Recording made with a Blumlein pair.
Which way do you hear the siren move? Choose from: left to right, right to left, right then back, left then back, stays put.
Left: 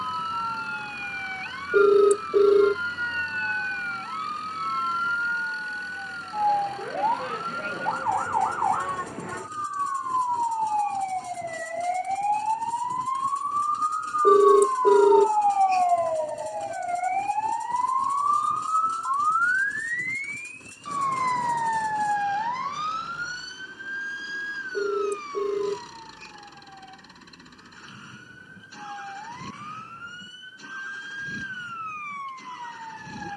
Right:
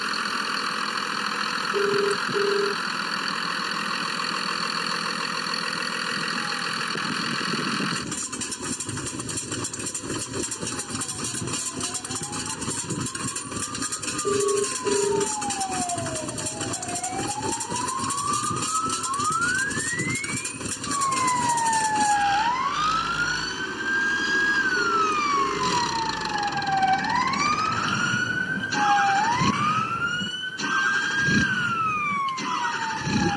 left to right.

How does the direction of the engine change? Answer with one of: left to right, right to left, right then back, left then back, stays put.
stays put.